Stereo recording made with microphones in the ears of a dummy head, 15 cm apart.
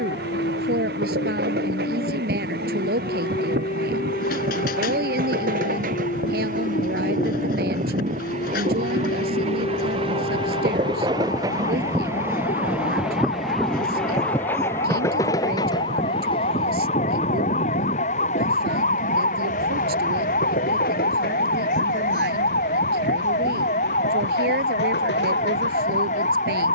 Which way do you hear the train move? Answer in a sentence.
You can hear the train go from the right side to the left.